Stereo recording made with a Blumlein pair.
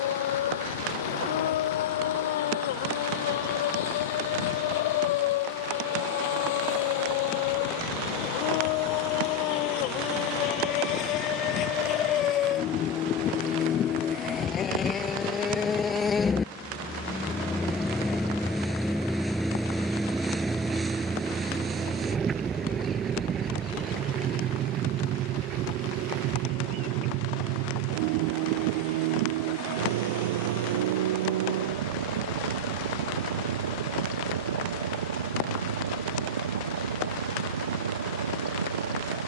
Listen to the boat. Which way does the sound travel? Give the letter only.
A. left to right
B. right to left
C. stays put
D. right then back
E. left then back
A.